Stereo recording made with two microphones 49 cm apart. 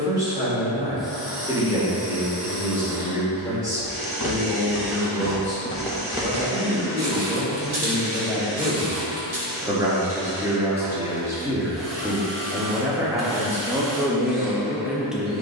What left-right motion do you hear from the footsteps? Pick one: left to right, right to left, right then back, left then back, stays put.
left to right.